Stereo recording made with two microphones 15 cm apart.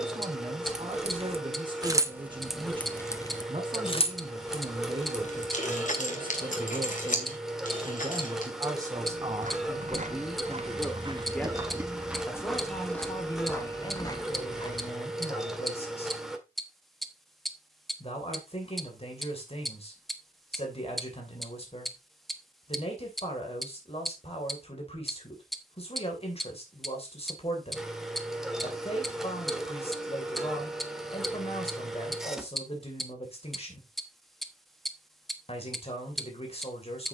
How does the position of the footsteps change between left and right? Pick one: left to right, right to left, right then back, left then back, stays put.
right to left.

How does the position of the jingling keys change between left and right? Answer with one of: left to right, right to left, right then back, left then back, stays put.
right to left.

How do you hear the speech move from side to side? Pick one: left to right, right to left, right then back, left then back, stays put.
right to left.